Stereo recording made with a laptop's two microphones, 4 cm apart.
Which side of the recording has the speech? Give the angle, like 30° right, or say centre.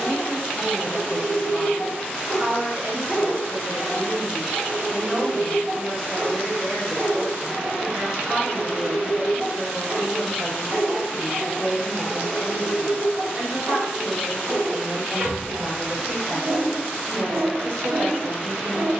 50° right.